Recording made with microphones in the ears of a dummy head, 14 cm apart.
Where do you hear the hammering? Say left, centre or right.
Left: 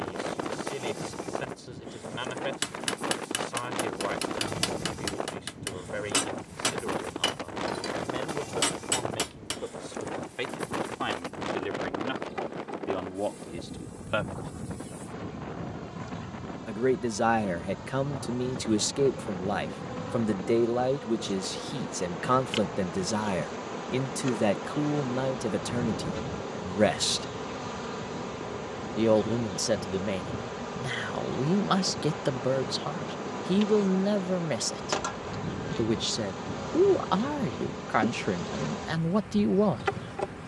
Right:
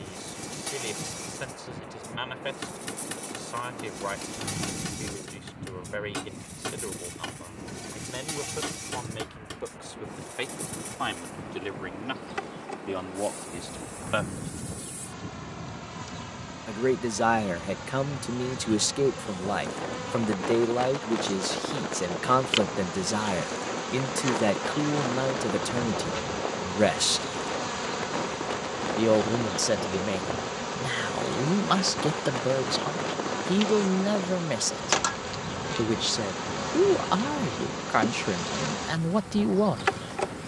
left.